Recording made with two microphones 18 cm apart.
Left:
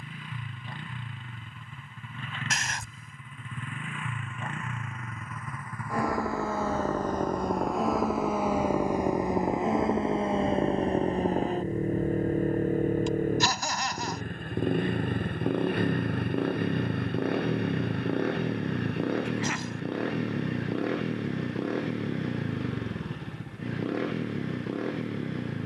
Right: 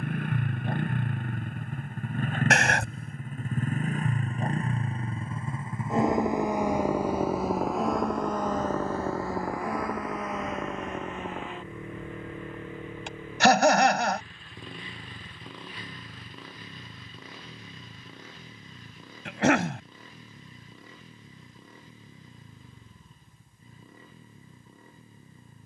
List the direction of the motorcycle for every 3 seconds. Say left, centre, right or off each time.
right, right, centre, left, left, left, left, left, left.